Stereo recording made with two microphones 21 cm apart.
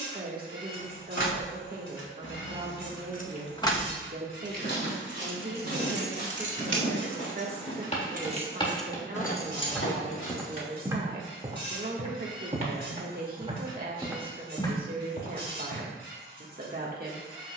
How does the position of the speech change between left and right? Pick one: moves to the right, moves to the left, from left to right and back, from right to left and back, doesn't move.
doesn't move.